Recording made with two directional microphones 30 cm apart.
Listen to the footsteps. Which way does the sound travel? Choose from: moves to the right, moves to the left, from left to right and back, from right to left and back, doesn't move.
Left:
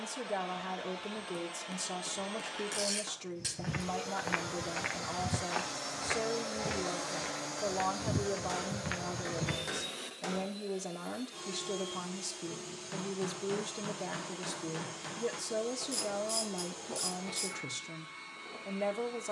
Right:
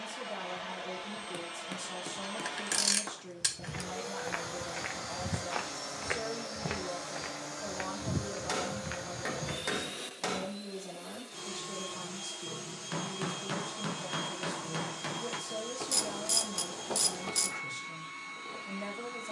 from left to right and back.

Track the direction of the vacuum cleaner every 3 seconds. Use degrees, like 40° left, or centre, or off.
30° right, 10° right, 10° left, 20° right, 30° right, 30° right, 30° right.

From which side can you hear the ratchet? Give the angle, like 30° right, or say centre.
60° right.